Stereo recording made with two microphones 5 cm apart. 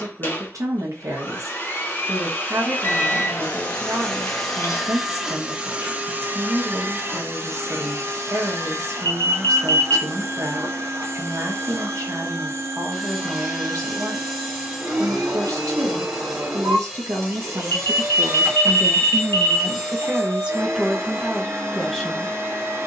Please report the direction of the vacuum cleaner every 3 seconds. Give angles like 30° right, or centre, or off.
40° left, centre, 50° right, 60° right, 60° right, 60° right, 60° right, 60° right.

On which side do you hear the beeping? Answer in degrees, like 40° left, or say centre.
60° left.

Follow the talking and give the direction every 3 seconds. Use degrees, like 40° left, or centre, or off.
80° right, 80° right, 80° right, 80° right, 80° right, 80° right, 40° right, centre.